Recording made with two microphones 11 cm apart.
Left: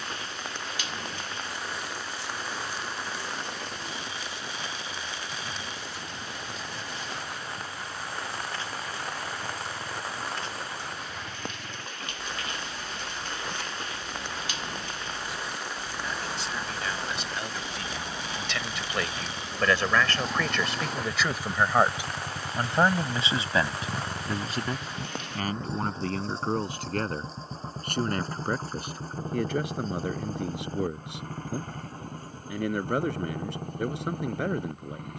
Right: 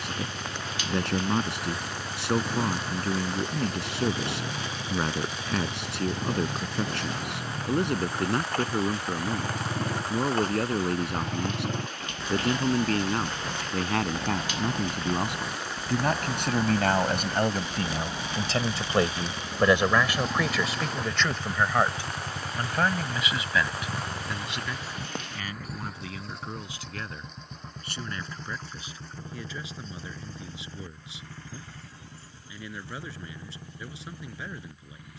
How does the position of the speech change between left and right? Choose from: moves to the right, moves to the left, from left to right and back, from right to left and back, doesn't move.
moves to the left.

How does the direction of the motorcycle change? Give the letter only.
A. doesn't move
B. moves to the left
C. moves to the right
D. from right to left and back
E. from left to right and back
B.